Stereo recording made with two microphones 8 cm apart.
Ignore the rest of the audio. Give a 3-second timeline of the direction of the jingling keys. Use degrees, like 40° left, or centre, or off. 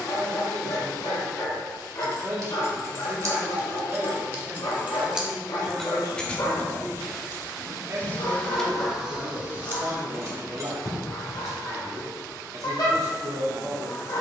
50° right, 30° right, 20° left, 30° right, off.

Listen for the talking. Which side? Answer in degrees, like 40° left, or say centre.
50° right.